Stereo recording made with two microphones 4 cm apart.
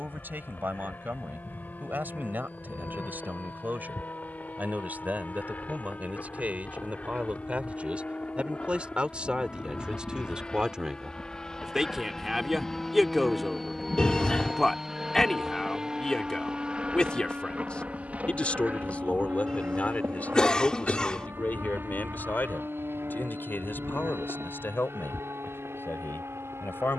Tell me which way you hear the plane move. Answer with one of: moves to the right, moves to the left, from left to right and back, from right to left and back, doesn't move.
moves to the right.